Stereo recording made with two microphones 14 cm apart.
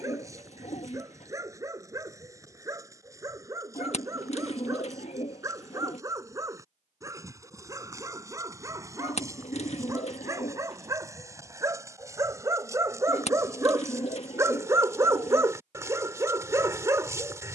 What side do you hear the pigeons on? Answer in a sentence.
You can hear the pigeons on the left.